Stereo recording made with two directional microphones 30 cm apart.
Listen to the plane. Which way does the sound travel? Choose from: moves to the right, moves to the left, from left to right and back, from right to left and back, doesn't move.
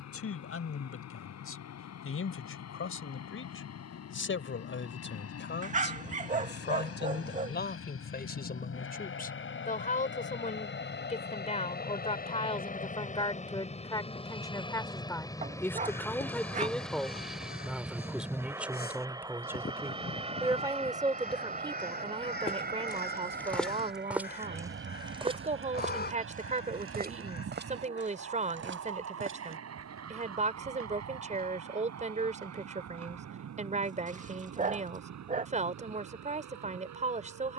moves to the right.